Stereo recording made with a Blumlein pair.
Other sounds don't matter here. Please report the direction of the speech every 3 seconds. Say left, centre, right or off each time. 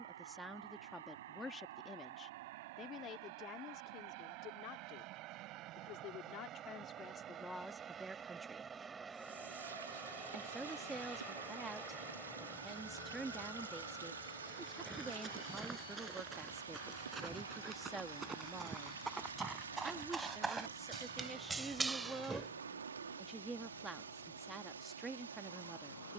centre, left, centre, centre, centre, centre, centre, centre, centre.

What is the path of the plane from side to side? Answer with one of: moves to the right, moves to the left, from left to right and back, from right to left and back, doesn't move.
moves to the left.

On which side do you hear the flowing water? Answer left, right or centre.
right.